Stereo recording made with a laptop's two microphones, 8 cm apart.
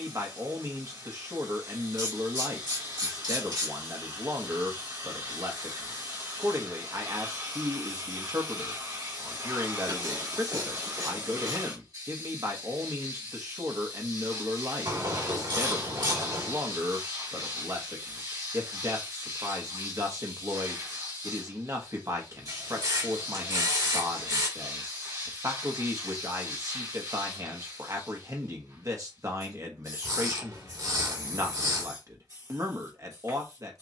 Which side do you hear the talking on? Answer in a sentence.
In this clip you hear the talking on the right.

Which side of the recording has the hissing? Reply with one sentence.
In this clip you hear the hissing on the right.